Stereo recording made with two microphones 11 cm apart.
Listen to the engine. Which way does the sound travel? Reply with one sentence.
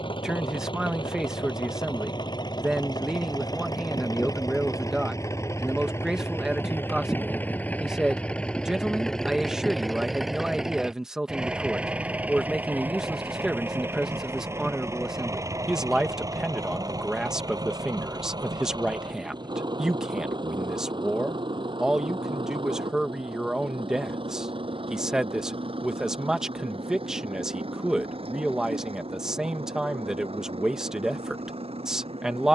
You can hear the engine move to the right.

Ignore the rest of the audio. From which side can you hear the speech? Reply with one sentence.
In this clip you hear the speech in the centre.